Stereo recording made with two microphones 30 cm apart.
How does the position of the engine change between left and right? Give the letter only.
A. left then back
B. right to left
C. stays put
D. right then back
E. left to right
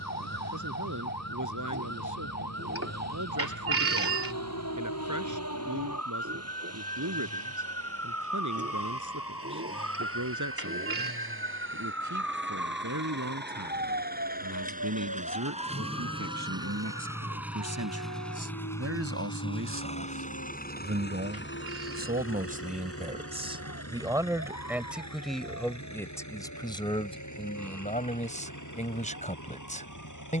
B.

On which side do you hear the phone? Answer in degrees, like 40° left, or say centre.
50° right.